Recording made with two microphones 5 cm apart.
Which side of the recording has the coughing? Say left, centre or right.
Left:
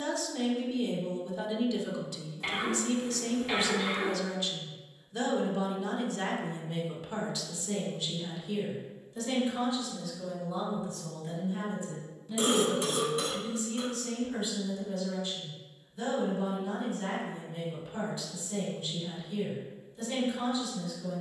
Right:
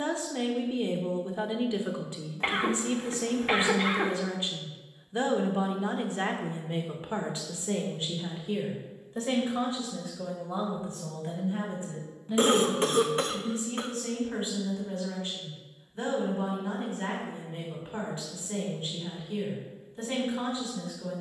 right.